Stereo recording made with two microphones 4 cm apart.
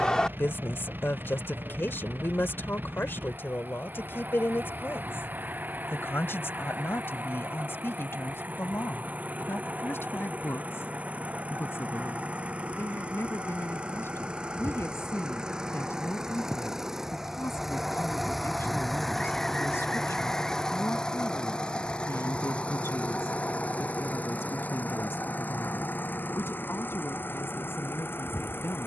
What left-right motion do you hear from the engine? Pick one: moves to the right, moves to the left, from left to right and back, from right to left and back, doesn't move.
moves to the left.